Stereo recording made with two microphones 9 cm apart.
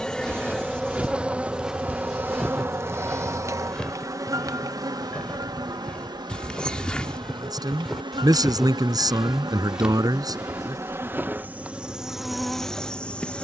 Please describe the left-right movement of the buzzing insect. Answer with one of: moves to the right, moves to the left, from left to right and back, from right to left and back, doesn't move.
from left to right and back.